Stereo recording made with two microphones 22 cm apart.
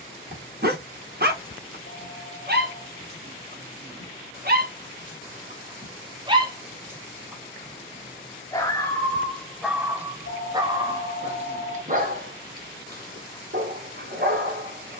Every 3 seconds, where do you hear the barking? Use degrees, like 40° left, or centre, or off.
50° right, 40° right, centre, 10° right, 40° right.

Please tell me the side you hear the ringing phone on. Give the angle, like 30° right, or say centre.
60° left.